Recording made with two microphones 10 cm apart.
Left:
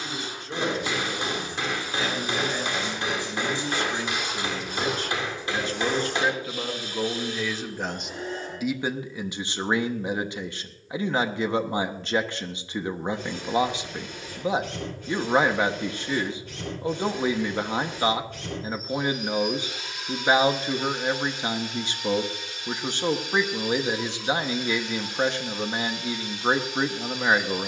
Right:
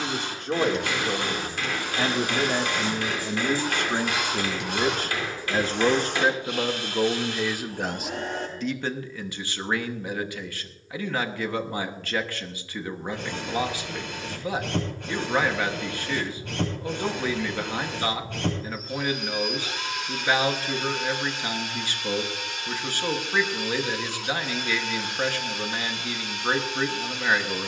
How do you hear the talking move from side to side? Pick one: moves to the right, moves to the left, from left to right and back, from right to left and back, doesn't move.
moves to the left.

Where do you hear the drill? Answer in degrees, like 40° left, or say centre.
80° right.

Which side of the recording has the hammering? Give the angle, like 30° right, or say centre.
20° left.